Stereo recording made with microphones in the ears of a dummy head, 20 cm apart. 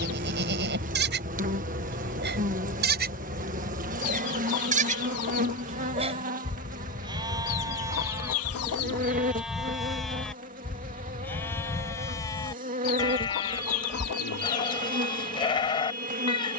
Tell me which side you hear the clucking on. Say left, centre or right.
left.